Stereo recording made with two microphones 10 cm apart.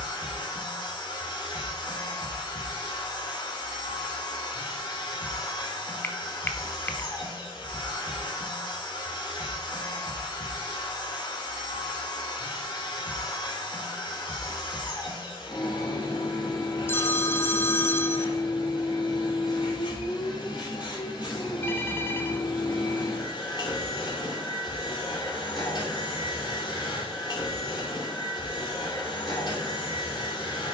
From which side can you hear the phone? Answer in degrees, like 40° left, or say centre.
20° left.